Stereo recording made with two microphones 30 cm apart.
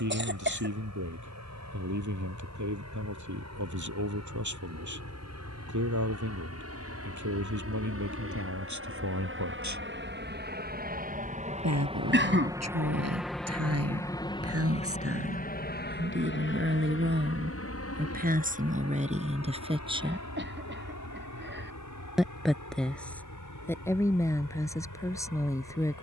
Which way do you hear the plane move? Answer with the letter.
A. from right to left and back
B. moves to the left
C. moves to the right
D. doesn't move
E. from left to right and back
B.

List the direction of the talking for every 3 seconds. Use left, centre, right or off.
right, right, right, right, right, right, right, centre, centre.